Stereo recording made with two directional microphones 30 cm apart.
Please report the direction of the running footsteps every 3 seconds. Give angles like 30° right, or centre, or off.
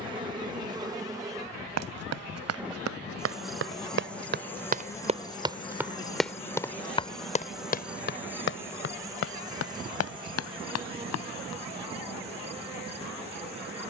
60° right, 30° right, 20° left, 50° left, off.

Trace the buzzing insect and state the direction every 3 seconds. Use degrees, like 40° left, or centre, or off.
10° right, 10° left, centre, 20° right, 20° right.